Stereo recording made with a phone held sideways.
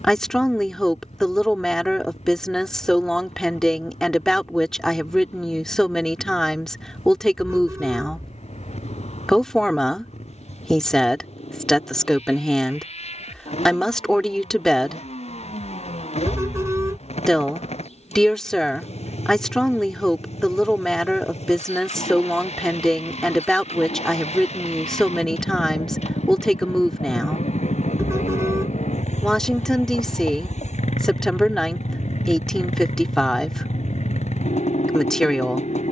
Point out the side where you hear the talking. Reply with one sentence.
You can hear the talking in the centre.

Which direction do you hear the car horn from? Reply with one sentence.
You can hear the car horn on the right.